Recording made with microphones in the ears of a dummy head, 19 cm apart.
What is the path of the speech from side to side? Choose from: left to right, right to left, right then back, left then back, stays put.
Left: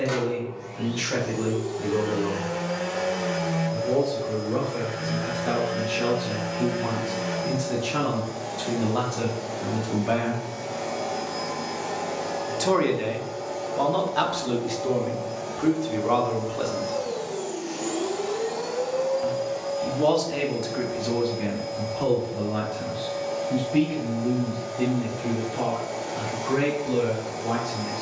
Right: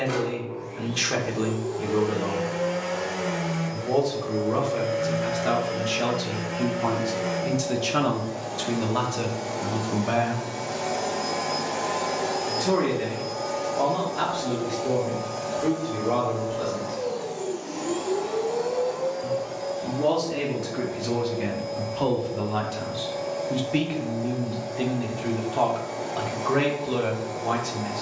left then back.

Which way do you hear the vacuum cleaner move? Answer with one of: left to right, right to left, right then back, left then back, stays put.
right then back.